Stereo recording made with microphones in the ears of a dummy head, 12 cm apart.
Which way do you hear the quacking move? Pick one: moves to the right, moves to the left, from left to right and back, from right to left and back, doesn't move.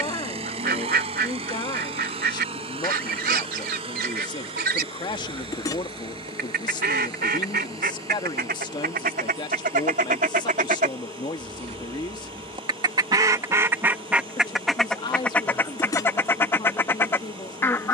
moves to the left.